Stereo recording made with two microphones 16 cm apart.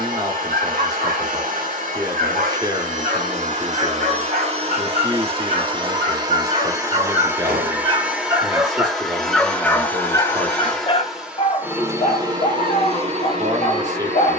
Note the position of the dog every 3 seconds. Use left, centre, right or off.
right, right, right, left, left.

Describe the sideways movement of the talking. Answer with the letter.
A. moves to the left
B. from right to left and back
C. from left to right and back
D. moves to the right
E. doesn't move
E.